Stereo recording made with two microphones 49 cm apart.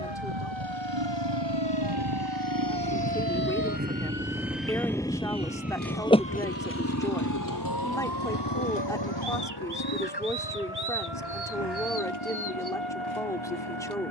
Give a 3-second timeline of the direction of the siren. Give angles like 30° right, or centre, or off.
60° right, 30° right, 40° left, 70° left, 80° left.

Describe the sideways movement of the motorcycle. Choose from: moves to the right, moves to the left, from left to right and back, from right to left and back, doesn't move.
moves to the left.